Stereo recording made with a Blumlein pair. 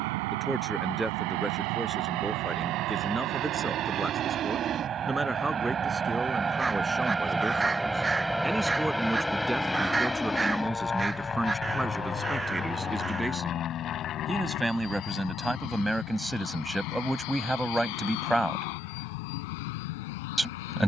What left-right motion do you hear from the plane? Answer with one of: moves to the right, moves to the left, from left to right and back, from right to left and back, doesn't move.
moves to the left.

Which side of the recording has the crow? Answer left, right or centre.
centre.